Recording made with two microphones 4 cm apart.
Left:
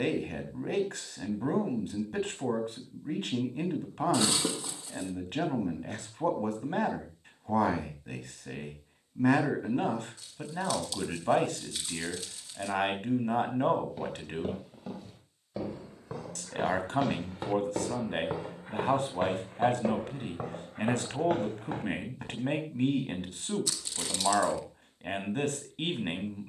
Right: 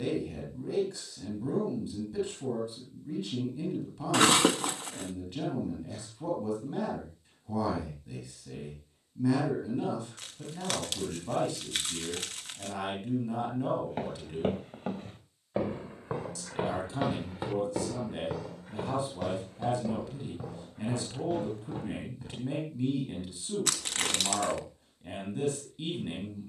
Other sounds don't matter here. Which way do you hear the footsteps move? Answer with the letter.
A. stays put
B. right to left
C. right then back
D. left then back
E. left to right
B.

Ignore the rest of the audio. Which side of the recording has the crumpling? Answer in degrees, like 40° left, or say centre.
60° right.